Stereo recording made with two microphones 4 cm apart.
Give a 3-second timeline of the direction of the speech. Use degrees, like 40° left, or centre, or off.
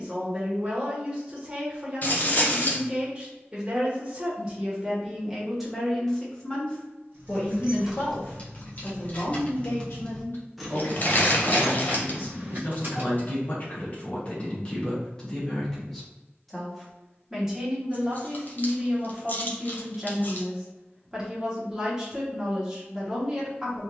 20° right, 10° right, 40° left, 60° left, 40° left, centre, 10° right, 10° right.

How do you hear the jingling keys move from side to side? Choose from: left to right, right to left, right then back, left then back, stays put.
left then back.